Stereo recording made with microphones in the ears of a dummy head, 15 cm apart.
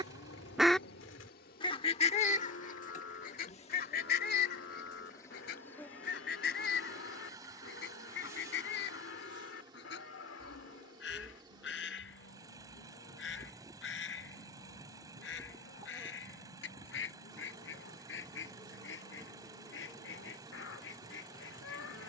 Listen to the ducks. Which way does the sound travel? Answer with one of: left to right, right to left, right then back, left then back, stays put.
right to left.